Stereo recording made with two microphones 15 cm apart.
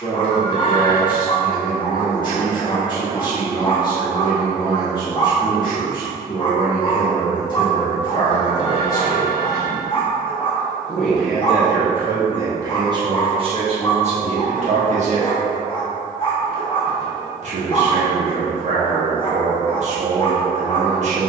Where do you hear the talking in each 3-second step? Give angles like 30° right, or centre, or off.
30° left, 30° left, 30° left, centre, 40° right, 50° right, 50° right.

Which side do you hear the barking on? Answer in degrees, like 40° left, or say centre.
30° left.